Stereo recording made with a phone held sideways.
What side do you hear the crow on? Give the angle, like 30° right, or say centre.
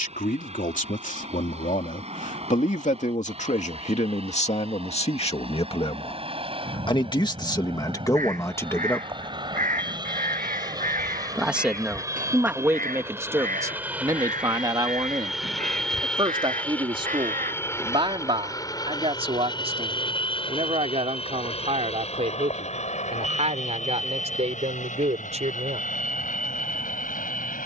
80° right.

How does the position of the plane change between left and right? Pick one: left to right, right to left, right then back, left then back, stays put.
right to left.